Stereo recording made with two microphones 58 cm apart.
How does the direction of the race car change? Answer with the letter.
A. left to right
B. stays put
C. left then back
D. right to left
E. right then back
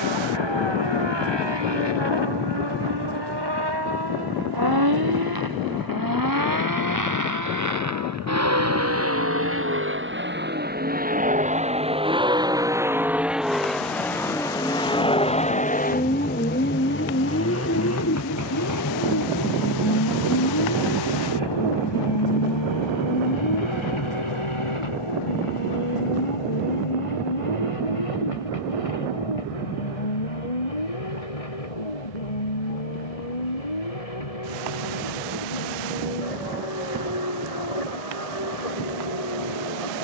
D.